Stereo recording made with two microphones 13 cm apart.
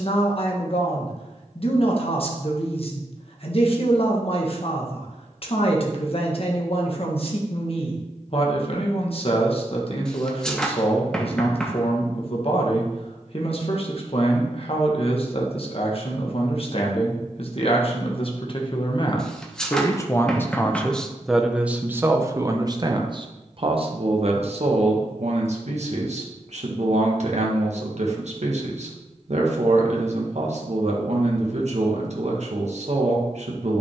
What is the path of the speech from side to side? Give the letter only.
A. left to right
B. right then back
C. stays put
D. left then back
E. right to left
A.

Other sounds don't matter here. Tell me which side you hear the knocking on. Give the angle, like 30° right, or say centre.
centre.